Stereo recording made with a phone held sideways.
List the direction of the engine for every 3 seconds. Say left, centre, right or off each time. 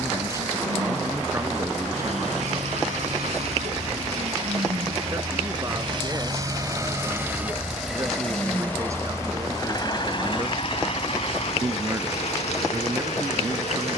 right, right, centre, left, left.